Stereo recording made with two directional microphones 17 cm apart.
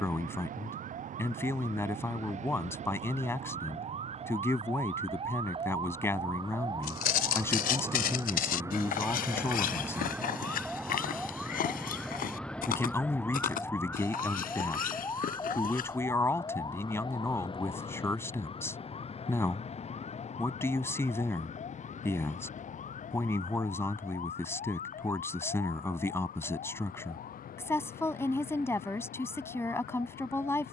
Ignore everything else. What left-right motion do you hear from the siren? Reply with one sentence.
You can hear the siren move to the left.